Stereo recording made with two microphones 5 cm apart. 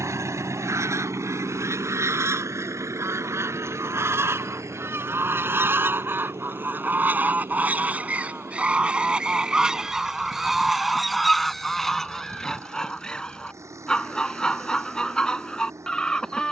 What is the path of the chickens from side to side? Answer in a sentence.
In this clip you hear the chickens go from the right side to the left.